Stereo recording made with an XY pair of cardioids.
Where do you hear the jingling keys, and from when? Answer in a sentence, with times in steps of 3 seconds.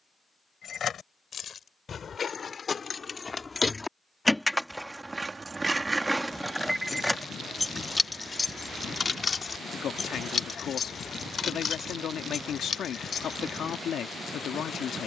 In this clip you hear the jingling keys on the left from 0 s, in the centre from 3 s and on the left from 9 s.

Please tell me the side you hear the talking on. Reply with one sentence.
In this clip you hear the talking on the left.